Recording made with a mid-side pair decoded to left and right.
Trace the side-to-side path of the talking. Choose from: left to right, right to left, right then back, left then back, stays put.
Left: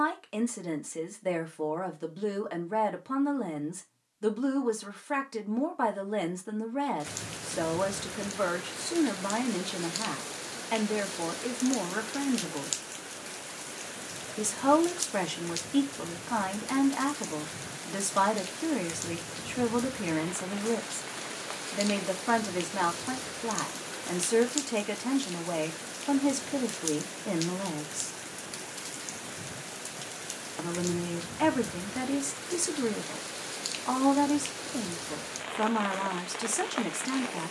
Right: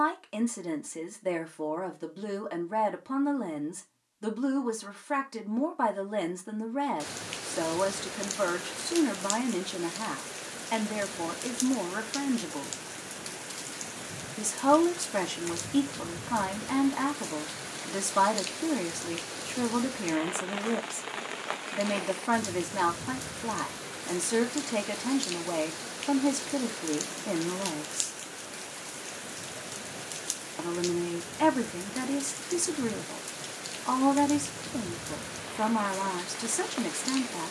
stays put.